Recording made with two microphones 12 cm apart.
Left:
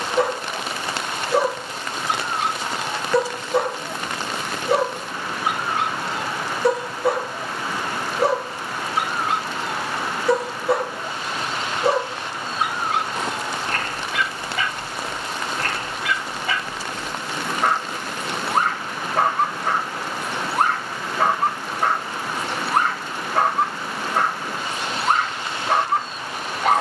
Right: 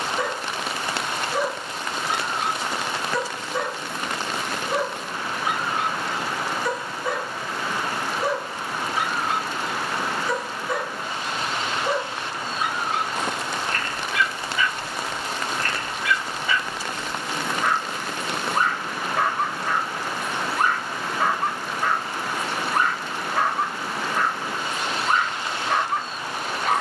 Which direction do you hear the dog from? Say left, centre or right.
left.